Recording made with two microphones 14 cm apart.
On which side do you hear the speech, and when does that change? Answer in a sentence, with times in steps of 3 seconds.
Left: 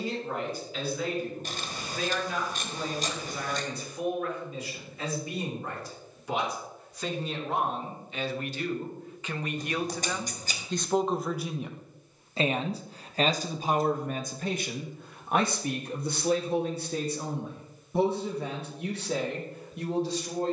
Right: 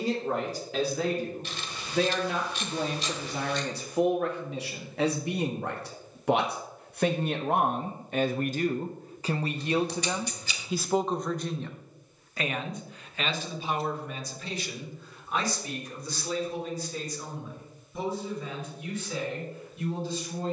You can hear the speech on the right from 0 s, in the centre from 9 s and on the left from 12 s.